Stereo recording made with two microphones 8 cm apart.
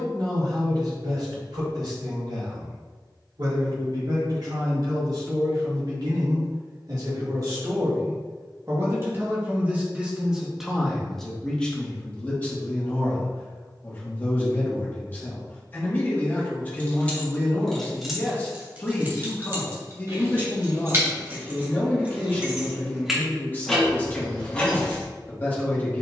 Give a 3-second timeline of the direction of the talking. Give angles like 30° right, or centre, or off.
80° right, 70° right, 50° right, 10° right, 20° left, 20° left, 20° left, 20° left, 20° left.